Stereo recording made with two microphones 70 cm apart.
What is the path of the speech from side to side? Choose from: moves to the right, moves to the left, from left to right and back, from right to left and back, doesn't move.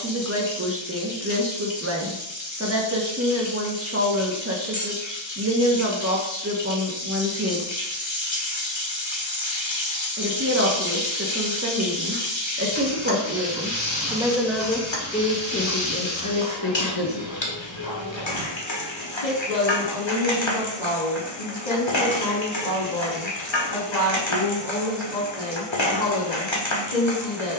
moves to the left.